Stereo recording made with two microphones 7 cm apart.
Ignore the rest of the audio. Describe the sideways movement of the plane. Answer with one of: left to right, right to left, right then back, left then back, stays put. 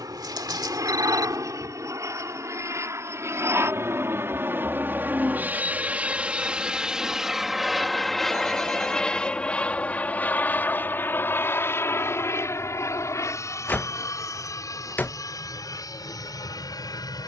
right to left.